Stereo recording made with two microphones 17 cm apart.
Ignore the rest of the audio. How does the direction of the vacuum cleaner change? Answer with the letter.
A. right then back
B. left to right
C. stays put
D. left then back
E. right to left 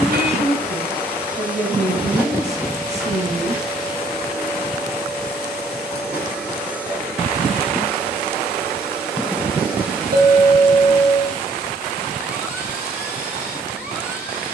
C.